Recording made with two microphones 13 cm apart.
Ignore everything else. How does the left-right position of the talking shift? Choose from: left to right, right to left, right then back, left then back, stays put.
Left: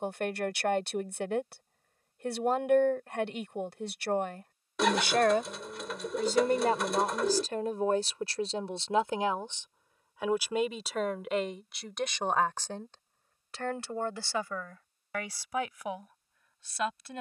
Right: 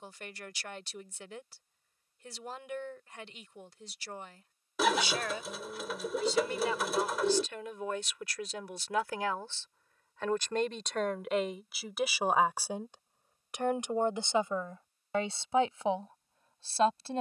left to right.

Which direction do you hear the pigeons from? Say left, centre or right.
centre.